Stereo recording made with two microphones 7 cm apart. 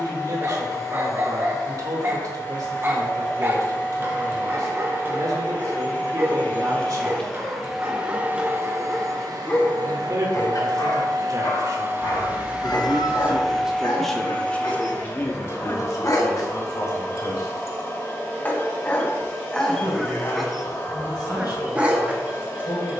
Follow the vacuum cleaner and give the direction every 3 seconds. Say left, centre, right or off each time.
left, left, centre, right, centre, left, left, left.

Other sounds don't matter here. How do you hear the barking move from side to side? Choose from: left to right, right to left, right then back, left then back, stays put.
left then back.